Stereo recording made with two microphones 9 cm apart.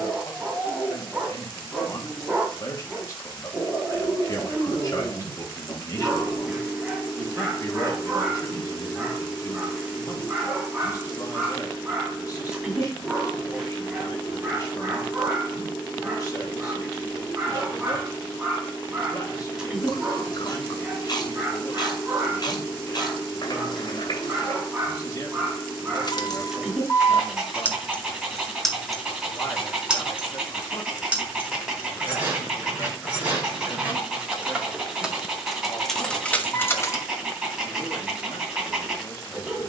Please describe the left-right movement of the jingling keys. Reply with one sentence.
In this clip you hear the jingling keys go right and come back.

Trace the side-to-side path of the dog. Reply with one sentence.
You can hear the dog stay put.